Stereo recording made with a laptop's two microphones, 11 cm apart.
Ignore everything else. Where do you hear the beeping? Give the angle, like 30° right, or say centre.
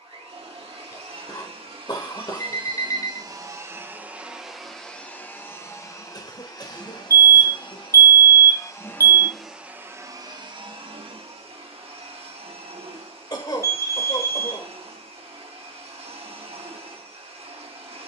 30° left.